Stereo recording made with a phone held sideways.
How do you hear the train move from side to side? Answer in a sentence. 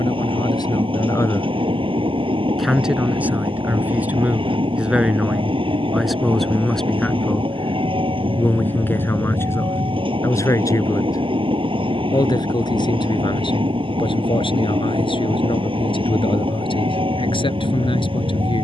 In this clip you hear the train stay put.